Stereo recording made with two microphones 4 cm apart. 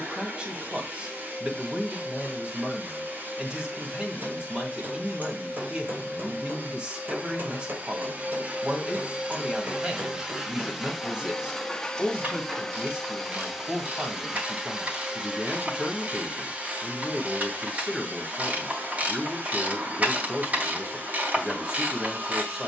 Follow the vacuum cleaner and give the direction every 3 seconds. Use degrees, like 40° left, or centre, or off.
50° right, 50° right, 40° right, 10° right, 10° right, 30° right, 50° right, 50° right.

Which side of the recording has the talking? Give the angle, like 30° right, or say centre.
30° right.